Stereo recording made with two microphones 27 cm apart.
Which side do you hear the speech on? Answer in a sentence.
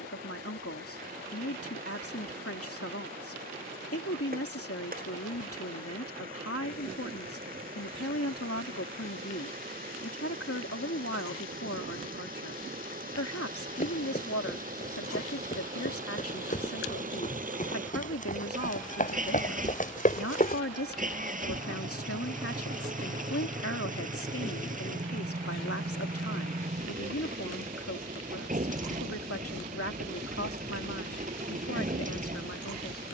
You can hear the speech on the left.